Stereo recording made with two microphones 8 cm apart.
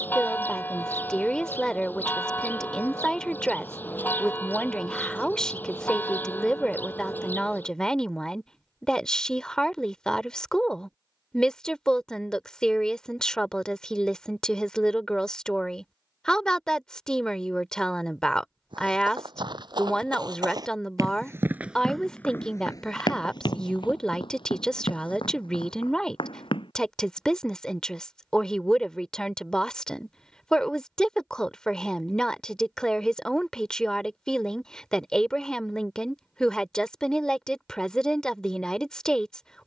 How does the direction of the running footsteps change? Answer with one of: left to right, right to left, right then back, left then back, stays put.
right to left.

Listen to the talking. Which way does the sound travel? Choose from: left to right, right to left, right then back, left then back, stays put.
stays put.